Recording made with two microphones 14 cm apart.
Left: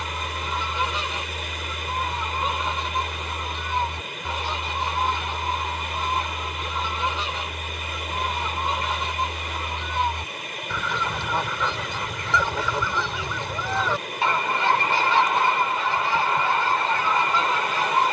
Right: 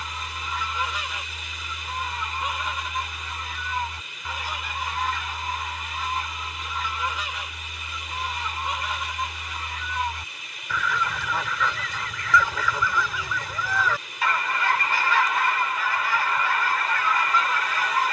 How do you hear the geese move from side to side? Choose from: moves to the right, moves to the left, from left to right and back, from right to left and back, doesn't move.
doesn't move.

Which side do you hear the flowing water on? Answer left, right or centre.
left.